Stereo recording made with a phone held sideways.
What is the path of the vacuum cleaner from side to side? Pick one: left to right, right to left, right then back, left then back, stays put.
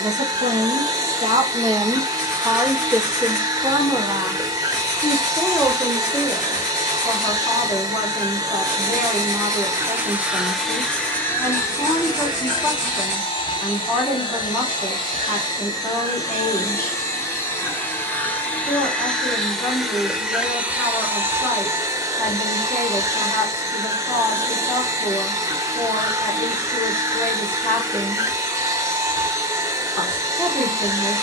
left then back.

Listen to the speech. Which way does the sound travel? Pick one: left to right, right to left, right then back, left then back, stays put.
right to left.